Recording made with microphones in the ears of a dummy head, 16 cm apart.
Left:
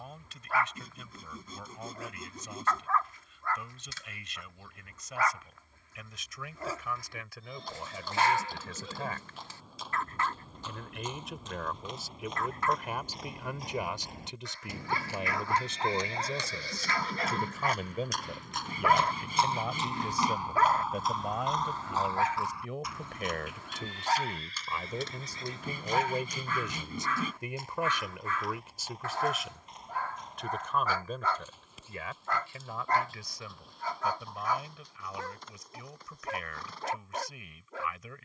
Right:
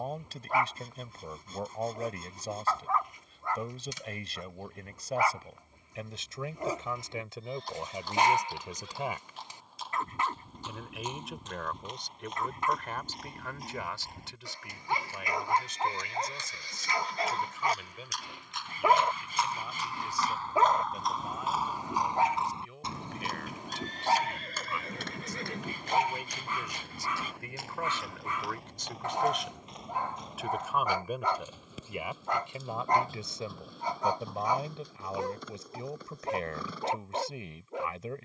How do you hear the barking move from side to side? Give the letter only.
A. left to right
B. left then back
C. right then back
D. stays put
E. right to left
D.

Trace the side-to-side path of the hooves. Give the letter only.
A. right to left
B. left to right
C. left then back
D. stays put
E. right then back
B.